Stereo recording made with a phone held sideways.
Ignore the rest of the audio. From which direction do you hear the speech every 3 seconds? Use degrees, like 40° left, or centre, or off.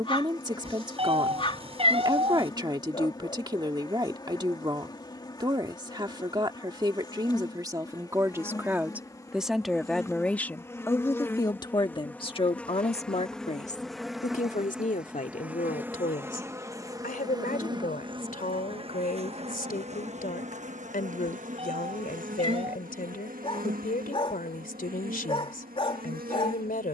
30° right, 30° right, 20° right, 10° left, 50° left, 70° left, 70° left, 70° left, 70° left.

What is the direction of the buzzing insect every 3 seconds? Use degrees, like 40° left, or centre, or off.
30° left, 30° left, 30° left, 20° left, centre, 20° right, 50° right, 70° right, 80° right.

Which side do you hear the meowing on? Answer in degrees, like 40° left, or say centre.
40° right.